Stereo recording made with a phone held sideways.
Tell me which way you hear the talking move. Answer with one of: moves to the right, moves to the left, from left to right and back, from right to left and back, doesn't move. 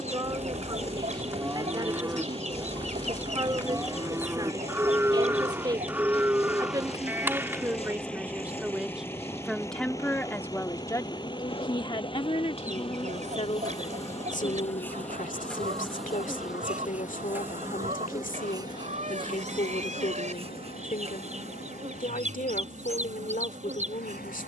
moves to the left.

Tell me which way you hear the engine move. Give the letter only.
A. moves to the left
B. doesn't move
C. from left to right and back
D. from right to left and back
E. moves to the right
A.